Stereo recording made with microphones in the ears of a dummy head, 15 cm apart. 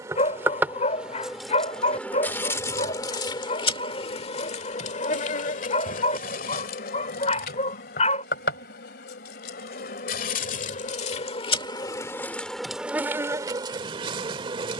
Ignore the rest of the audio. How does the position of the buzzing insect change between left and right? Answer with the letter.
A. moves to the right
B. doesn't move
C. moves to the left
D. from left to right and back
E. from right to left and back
E.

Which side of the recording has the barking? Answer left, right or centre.
left.